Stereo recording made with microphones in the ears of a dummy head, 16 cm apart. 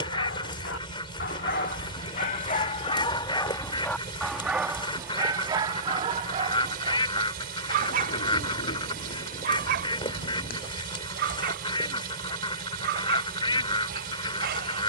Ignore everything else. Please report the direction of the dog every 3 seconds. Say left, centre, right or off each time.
left, centre, right, right, right.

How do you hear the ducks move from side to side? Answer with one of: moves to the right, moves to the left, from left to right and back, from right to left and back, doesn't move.
doesn't move.